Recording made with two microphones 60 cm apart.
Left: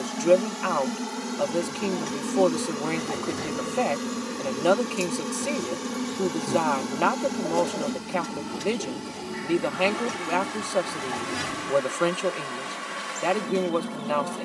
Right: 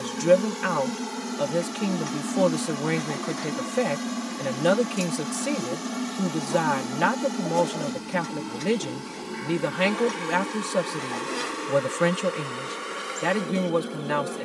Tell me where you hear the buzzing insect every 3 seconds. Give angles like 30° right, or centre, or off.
centre, 10° right, centre, 10° left, 20° left.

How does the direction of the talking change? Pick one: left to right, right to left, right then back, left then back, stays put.
stays put.